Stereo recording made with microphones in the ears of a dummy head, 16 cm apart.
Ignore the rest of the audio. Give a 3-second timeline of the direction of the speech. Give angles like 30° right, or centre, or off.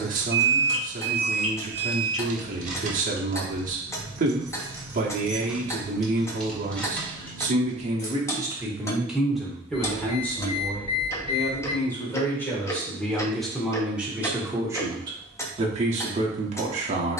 50° right, 50° right, 30° right, 10° left, centre, 40° right.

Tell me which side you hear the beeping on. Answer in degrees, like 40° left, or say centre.
30° left.